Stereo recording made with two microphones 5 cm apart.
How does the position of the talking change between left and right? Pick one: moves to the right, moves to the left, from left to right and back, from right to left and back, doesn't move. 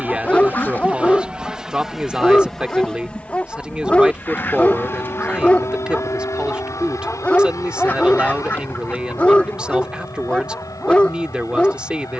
doesn't move.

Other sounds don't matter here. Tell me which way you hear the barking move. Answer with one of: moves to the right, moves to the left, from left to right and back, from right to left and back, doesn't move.
doesn't move.